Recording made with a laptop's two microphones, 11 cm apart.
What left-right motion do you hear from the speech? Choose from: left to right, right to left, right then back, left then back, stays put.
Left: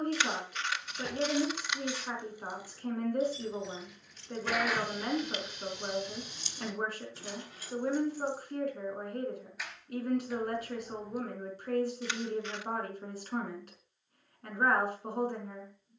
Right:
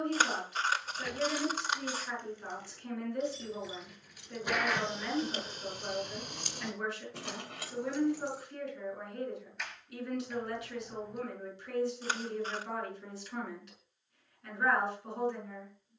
stays put.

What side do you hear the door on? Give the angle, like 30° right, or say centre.
centre.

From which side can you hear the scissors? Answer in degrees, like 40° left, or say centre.
40° right.